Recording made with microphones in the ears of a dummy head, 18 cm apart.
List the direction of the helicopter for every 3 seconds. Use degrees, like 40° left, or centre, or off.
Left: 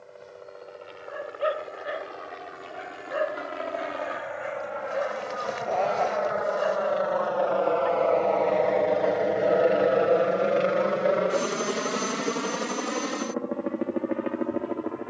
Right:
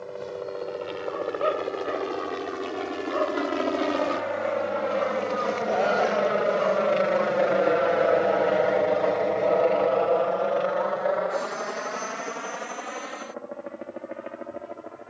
70° right, 60° right, 20° right, 30° left, 60° left.